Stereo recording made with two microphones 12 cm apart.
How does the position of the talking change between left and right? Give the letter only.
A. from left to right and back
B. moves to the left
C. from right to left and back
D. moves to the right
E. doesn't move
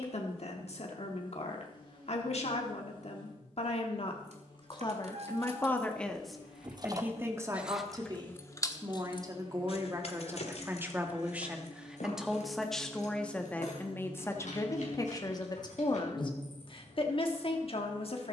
A.